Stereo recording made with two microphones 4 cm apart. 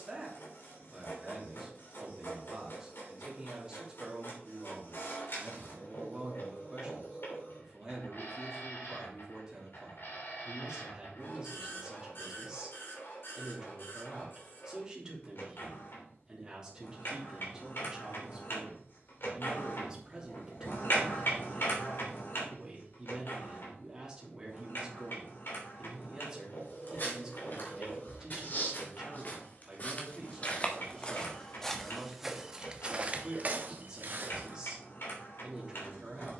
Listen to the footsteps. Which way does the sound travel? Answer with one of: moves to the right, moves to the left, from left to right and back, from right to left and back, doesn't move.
moves to the right.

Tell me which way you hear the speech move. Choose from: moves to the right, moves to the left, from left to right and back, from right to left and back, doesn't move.
doesn't move.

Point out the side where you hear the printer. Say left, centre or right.
left.